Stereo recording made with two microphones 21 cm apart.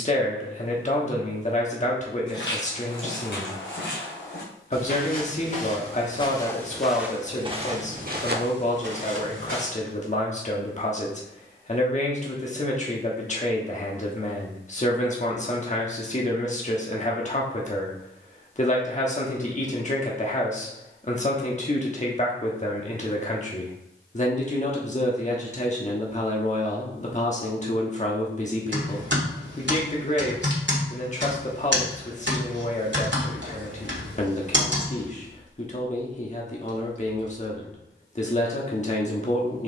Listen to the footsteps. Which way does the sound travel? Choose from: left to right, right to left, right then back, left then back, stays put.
left to right.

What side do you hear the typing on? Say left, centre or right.
right.